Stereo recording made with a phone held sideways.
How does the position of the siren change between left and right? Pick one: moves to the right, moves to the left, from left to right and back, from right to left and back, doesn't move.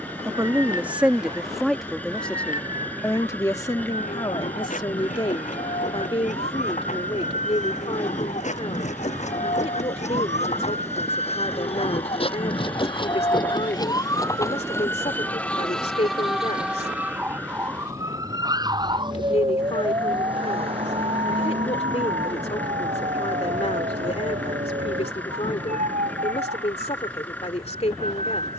moves to the right.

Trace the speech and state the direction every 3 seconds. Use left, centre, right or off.
centre, left, left, left, left, left, left, left, left, left.